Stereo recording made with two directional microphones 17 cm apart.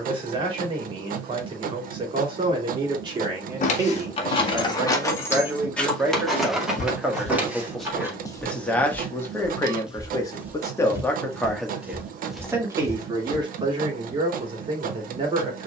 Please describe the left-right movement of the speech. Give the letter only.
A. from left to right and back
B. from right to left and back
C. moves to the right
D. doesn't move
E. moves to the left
B.